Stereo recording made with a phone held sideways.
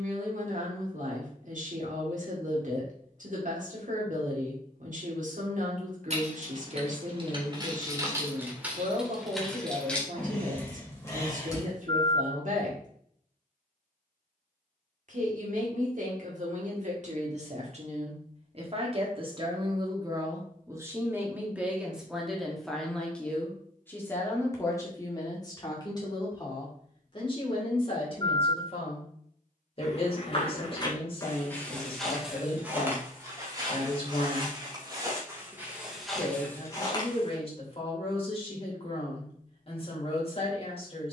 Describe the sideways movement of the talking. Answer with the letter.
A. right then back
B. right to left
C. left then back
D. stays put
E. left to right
B.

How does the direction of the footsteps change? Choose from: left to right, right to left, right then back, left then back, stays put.
right then back.